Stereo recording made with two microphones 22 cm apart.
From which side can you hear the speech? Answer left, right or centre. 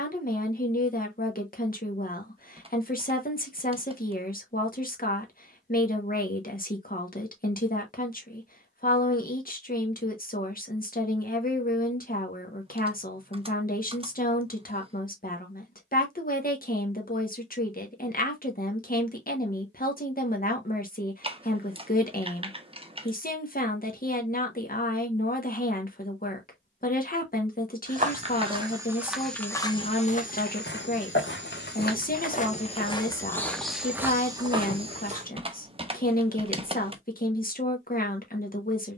left.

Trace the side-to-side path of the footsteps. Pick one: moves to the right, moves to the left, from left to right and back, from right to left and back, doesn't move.
from right to left and back.